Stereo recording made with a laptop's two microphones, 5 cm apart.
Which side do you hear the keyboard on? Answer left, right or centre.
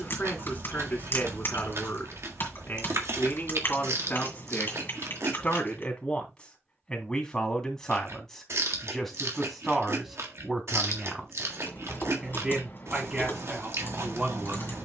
left.